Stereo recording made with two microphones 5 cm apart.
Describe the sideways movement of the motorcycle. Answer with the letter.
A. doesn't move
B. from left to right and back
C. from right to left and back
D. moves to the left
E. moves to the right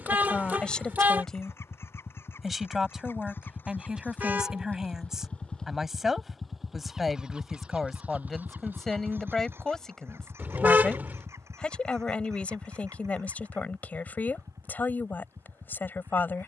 E.